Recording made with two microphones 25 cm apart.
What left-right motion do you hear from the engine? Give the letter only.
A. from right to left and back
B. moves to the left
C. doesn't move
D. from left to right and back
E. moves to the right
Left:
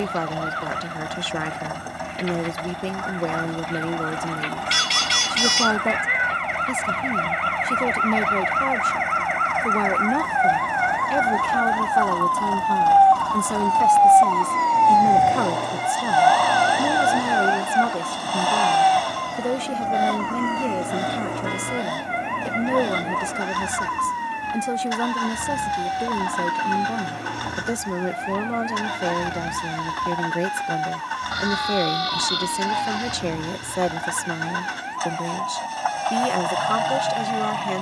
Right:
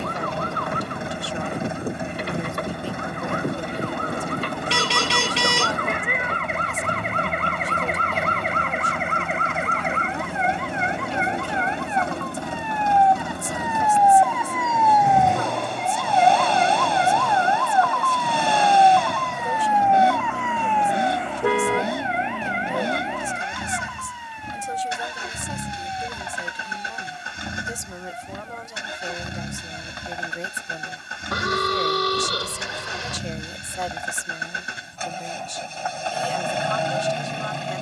C.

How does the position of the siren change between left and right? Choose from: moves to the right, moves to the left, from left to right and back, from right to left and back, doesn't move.
moves to the left.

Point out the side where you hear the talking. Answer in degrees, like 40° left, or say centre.
70° left.